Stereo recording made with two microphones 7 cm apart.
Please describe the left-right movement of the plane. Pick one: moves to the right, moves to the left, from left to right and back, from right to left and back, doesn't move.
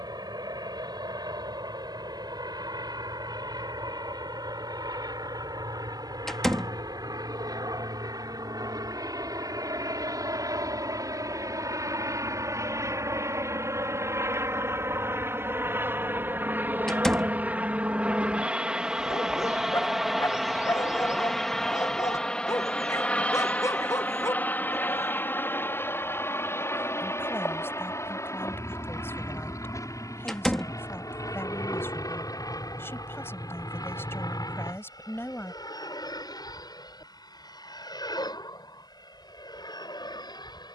moves to the left.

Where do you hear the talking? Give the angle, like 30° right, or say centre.
30° left.